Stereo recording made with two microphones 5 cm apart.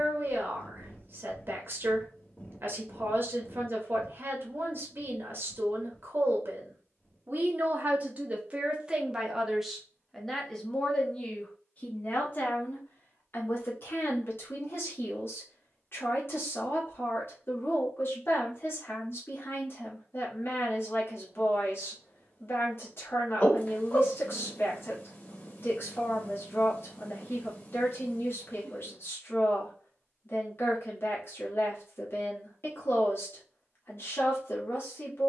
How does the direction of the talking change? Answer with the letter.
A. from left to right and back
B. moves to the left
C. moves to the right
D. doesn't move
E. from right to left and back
B.